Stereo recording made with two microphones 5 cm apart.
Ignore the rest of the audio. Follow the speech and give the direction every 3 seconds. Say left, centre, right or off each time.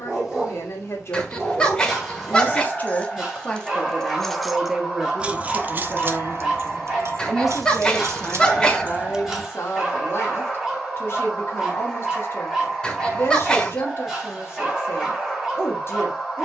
left, centre, centre, left, left, left.